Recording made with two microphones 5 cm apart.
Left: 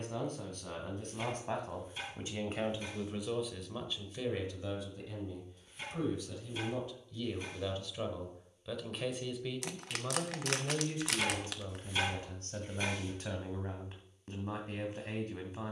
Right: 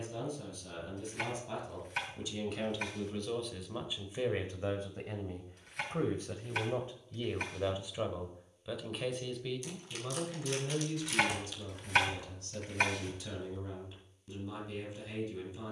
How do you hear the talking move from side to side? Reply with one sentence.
You can hear the talking move from left to right and back again.